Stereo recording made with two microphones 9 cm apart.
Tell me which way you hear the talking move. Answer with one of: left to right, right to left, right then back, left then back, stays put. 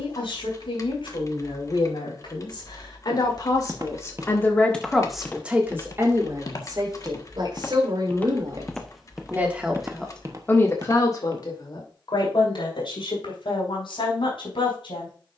right then back.